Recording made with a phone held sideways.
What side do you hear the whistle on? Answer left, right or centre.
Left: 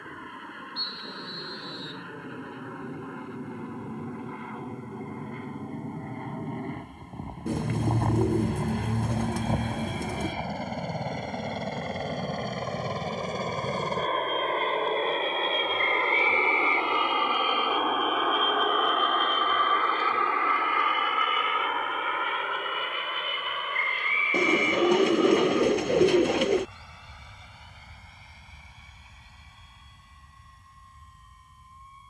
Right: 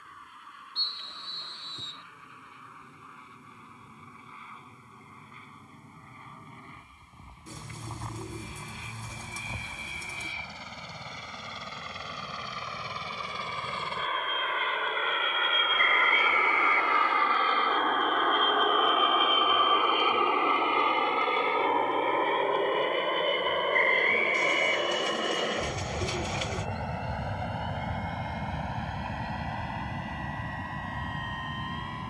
right.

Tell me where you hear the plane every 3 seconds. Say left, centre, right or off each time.
left, left, left, left, left, left, centre, right, right, right, right.